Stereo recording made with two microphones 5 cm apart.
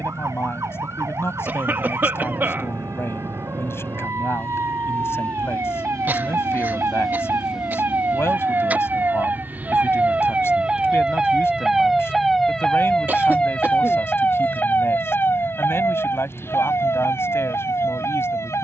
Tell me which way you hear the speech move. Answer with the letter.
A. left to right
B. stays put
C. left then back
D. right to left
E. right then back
B.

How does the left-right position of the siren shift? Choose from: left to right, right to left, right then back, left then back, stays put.
right to left.